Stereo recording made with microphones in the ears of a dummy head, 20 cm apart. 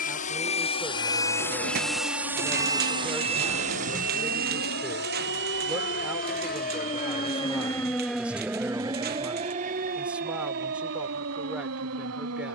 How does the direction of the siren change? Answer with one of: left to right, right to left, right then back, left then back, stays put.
left to right.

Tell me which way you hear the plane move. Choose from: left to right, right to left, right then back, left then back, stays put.
left to right.